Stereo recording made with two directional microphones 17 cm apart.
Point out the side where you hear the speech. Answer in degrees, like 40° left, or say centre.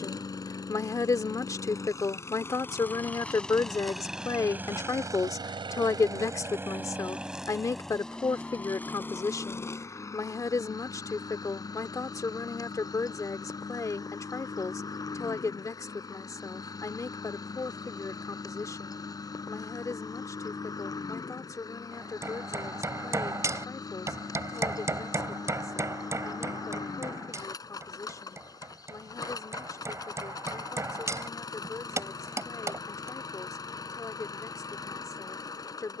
20° left.